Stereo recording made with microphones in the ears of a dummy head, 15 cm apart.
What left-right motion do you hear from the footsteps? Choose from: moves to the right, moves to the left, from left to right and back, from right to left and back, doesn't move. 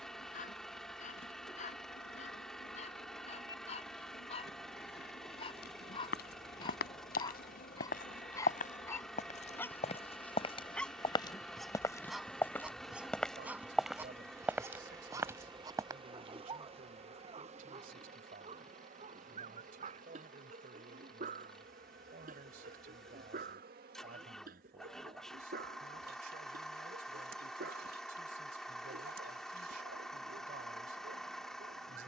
moves to the right.